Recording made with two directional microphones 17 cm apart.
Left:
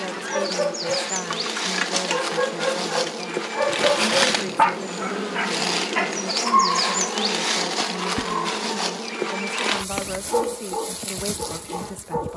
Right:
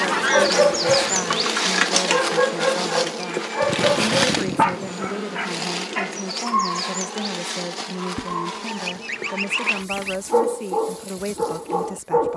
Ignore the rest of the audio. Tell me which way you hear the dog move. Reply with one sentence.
In this clip you hear the dog go left and come back.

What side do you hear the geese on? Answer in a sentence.
You can hear the geese on the right.